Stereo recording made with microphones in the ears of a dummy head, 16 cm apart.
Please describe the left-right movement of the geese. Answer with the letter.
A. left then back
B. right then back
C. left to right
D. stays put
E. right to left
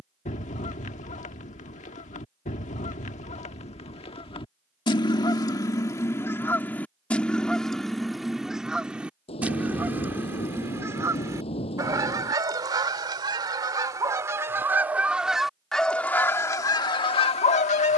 B.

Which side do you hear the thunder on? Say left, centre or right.
left.